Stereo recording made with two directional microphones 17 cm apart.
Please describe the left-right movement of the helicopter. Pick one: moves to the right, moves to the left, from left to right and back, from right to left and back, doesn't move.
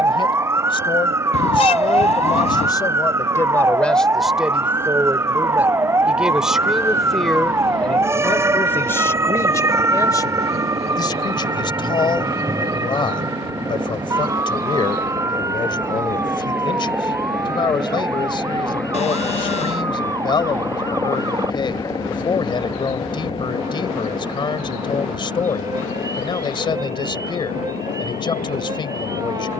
moves to the left.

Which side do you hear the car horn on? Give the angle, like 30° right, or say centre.
40° left.